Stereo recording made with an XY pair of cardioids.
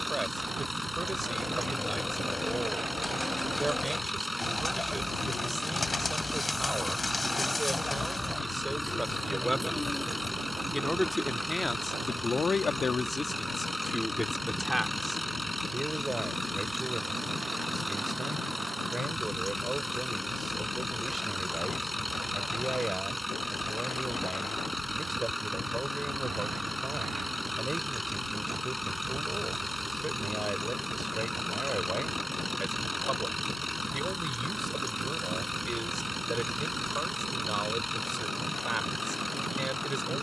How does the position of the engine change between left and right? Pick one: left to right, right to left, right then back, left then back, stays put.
stays put.